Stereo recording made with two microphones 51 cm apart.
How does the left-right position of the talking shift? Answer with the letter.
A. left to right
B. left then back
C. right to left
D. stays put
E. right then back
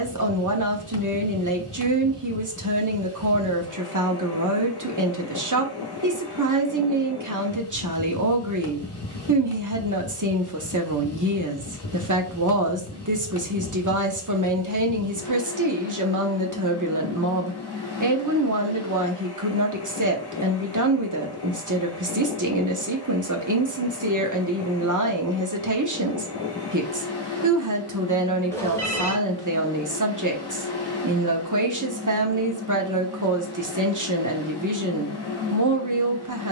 D.